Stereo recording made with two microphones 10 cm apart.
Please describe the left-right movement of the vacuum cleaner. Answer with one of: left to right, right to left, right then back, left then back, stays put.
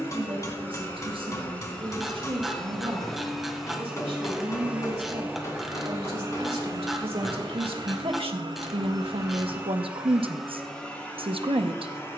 right then back.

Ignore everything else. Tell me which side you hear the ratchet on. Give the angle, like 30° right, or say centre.
centre.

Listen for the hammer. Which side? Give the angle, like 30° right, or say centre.
30° left.